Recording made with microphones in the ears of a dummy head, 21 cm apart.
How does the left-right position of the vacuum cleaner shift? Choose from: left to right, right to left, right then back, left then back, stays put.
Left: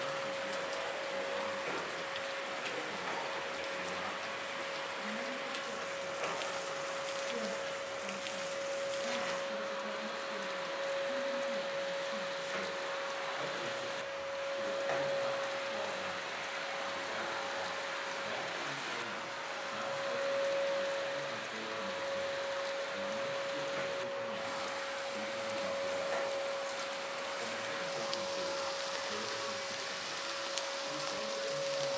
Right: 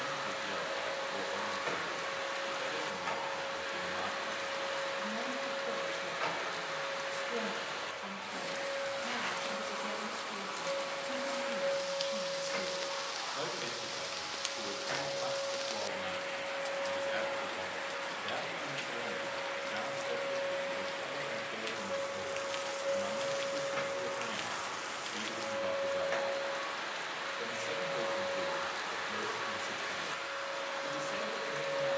left then back.